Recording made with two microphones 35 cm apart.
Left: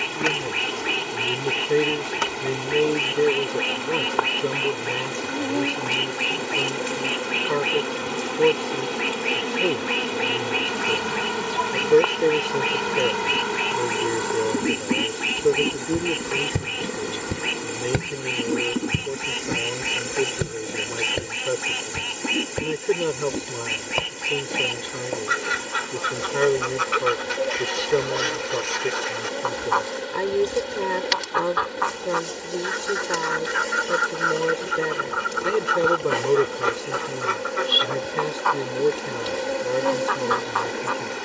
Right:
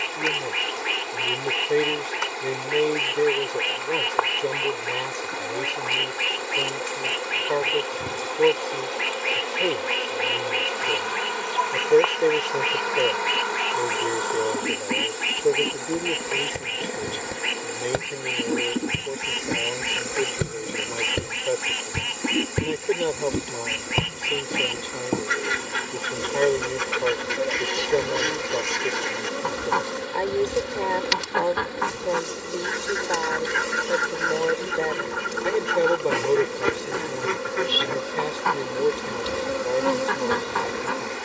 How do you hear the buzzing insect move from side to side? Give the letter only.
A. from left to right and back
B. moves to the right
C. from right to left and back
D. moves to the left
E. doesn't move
B.